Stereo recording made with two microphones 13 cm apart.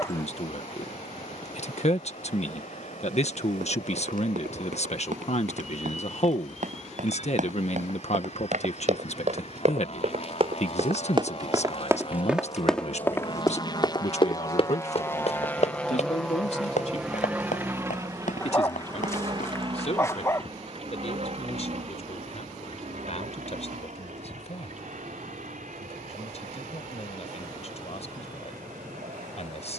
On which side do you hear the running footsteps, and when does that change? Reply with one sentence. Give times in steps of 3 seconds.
You can hear the running footsteps not at all from 0 s, on the right from 3 s, on the left from 12 s and not at all from 21 s.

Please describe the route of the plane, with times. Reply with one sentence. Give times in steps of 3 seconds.
You can hear the plane on the left from 0 s, in the centre from 15 s and on the right from 18 s.